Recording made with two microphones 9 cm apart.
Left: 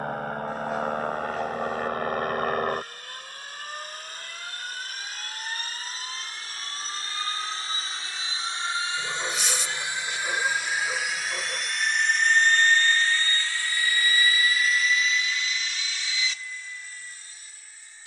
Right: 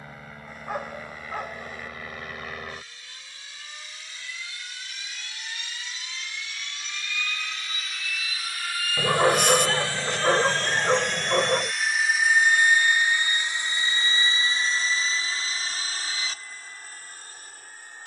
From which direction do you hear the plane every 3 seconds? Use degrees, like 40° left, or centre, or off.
60° left, 50° left, 30° left, 10° left, 20° right, 40° right.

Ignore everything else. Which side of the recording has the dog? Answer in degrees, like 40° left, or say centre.
60° right.